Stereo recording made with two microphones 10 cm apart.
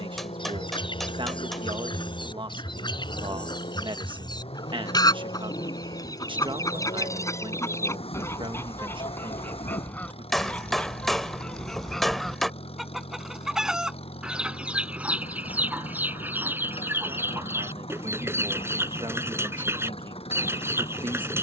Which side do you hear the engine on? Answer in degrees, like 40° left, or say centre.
80° left.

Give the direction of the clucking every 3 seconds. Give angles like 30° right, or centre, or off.
60° left, 50° left, 30° left, 10° left, 10° right, 20° right, 30° right.